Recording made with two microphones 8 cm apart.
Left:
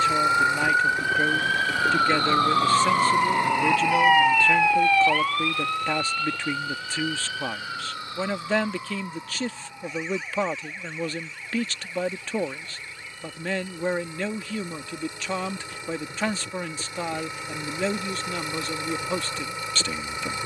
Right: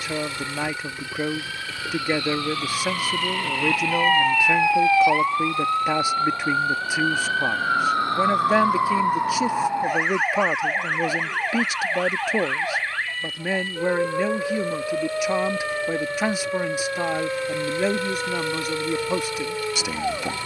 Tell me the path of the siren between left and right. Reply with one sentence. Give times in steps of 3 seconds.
In this clip you hear the siren on the left from 0 s, in the centre from 3 s and on the right from 6 s.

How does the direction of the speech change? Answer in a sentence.
You can hear the speech stay in one place.